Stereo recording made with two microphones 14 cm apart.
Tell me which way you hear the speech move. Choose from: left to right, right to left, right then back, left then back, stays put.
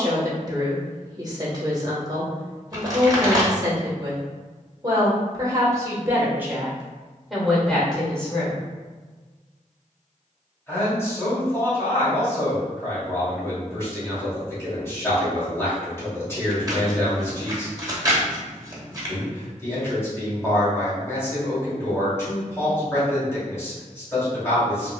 right to left.